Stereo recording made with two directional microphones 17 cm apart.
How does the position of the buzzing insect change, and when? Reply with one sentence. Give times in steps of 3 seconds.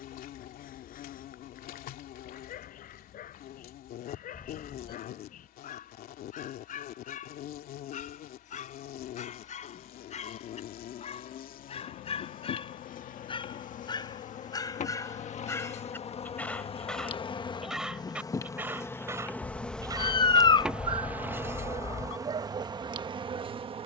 You can hear the buzzing insect on the left from 0 s, in the centre from 18 s and on the right from 21 s.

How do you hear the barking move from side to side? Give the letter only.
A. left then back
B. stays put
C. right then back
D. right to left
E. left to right
E.